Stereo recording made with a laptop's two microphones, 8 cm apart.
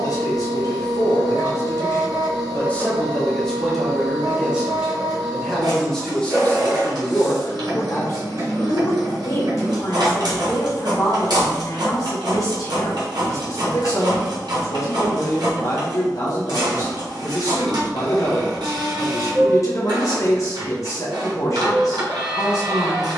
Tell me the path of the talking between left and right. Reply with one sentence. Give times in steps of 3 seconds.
You can hear the talking on the left from 0 s, in the centre from 3 s and on the left from 6 s.